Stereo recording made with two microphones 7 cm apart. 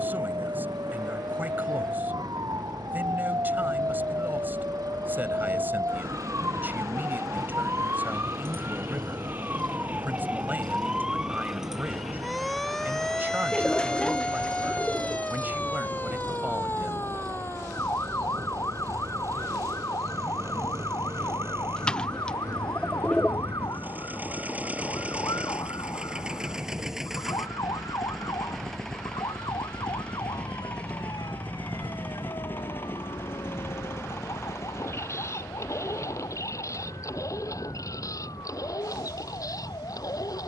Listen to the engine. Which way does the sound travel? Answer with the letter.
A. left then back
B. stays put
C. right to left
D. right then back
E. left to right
C.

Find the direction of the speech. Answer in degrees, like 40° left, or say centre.
30° right.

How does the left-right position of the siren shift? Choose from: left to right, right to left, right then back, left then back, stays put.
right to left.